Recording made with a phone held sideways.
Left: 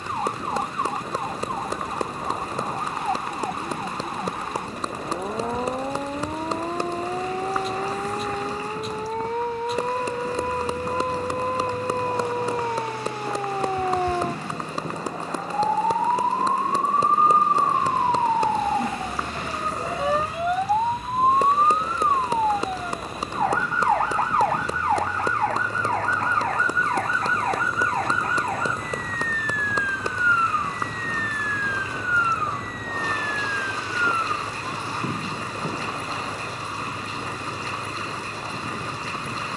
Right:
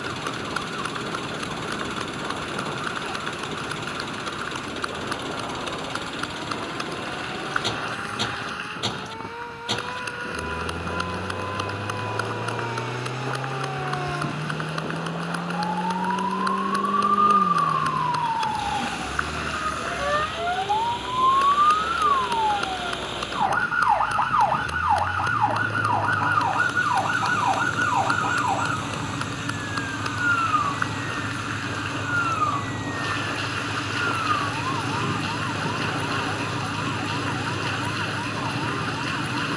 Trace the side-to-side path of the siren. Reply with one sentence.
In this clip you hear the siren go from the left side to the right.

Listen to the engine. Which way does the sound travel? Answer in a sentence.
You can hear the engine stay put.